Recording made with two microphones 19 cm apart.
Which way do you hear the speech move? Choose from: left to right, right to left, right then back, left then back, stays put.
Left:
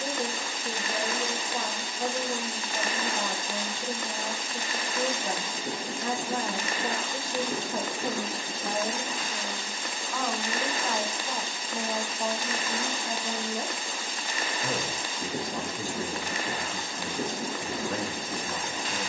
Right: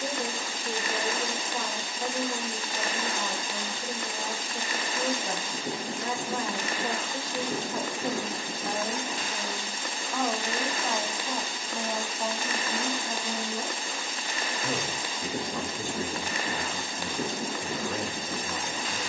right then back.